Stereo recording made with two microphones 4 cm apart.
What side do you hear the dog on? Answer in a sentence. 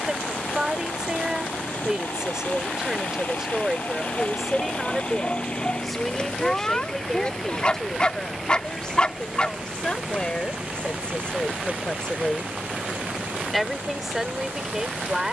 You can hear the dog on the left.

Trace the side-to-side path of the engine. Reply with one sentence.
You can hear the engine travel towards the right.